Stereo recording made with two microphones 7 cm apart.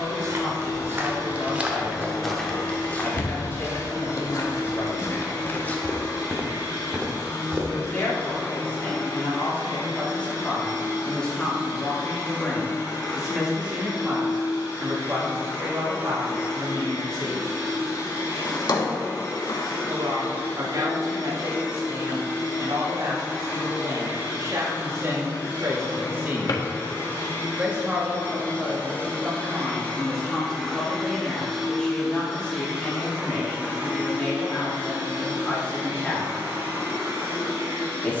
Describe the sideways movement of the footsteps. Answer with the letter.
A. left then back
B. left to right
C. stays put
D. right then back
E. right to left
A.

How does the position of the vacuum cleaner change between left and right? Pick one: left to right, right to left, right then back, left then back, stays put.
left to right.